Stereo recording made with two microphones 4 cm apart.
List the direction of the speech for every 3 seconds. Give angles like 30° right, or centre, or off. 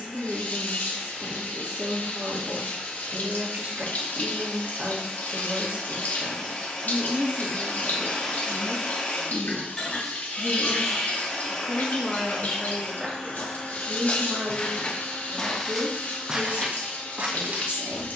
50° right, 50° right, 30° right, centre, 20° right, 50° right.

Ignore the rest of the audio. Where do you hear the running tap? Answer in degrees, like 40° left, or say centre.
50° left.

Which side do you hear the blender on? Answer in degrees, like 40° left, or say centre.
20° left.